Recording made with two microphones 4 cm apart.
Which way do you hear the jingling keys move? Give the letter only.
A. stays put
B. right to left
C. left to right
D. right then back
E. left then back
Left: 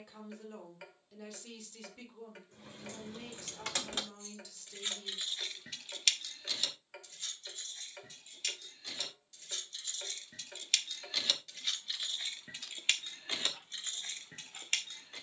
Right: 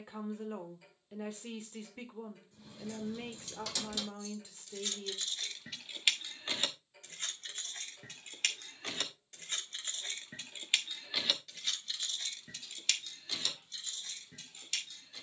D.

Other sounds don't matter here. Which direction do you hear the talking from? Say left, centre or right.
right.